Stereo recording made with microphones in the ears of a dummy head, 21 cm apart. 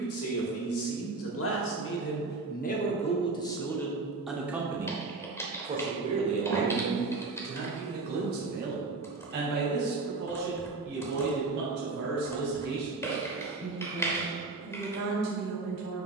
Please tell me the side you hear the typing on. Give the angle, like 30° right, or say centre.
10° left.